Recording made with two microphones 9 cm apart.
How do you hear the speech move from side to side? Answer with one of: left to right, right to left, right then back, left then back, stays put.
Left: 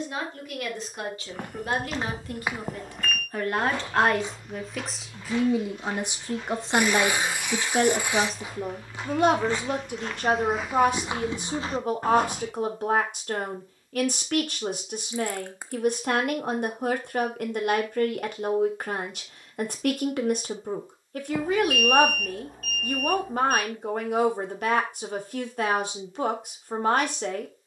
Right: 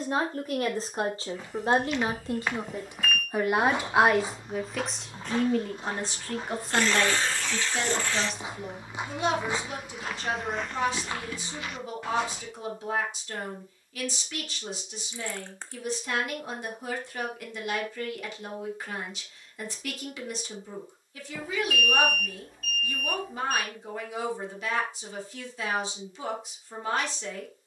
right to left.